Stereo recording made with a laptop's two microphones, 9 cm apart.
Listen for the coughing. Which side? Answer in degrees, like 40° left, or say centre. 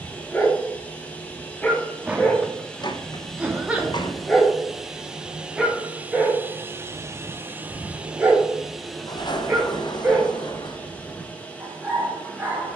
10° right.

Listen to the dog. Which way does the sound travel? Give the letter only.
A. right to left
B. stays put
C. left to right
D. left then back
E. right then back
C.